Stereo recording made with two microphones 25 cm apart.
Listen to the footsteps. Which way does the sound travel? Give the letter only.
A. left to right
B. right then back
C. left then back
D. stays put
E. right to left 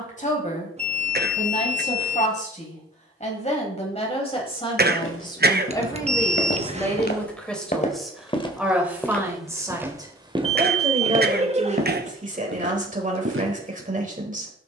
A.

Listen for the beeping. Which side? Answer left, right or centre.
right.